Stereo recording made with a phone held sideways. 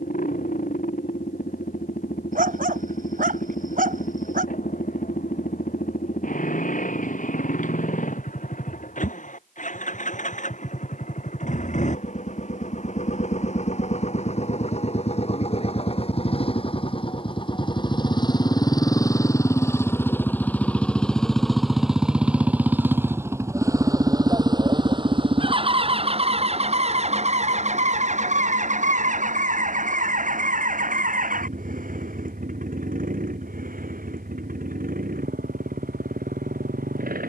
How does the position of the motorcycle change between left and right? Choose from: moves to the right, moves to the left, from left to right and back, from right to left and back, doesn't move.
moves to the right.